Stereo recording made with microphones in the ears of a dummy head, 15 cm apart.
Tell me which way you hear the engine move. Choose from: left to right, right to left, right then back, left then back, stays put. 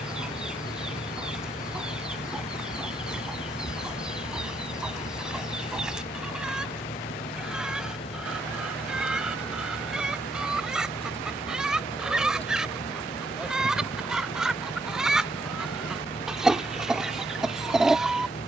stays put.